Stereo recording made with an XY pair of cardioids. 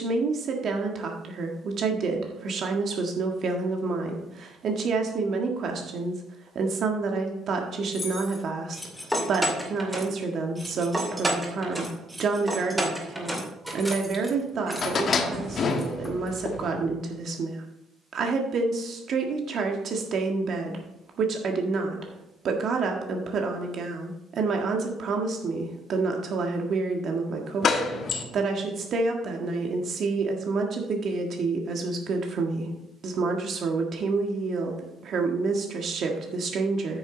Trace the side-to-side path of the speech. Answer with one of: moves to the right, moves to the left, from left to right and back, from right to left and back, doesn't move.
doesn't move.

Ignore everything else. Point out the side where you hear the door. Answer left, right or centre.
left.